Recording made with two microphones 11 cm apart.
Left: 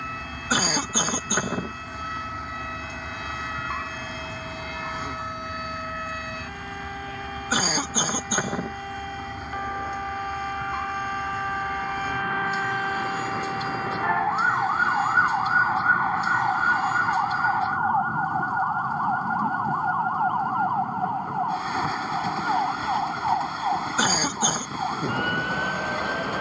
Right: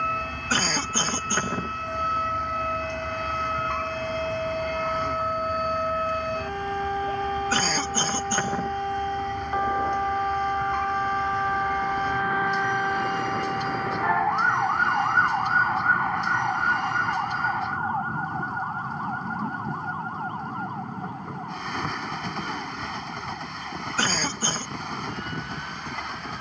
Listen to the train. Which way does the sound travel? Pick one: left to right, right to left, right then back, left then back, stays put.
stays put.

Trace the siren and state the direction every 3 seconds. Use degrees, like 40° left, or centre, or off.
50° right, 40° right, 40° right, 20° right, 10° right, 10° left, 30° left, 50° left, 60° left.